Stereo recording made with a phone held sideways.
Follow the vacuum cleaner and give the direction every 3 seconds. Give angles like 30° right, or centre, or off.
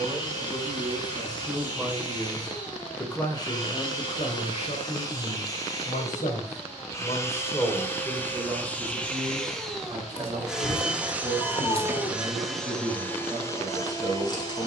30° left, 30° left, 20° left, centre, 10° left.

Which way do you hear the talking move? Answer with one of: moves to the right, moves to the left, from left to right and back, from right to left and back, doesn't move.
from right to left and back.